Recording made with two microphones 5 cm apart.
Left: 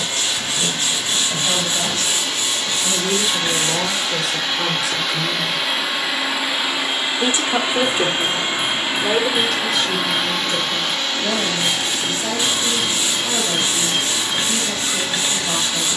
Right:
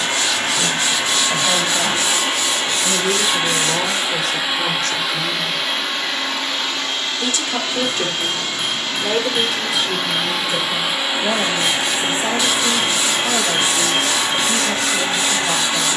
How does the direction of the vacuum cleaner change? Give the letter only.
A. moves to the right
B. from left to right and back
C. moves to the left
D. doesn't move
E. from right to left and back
E.